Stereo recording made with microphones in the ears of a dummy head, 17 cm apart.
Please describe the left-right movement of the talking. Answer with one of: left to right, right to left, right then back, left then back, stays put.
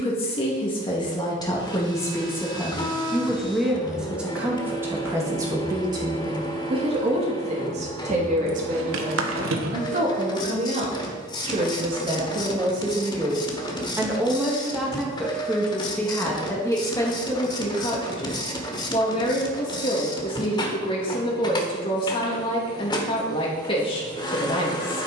right then back.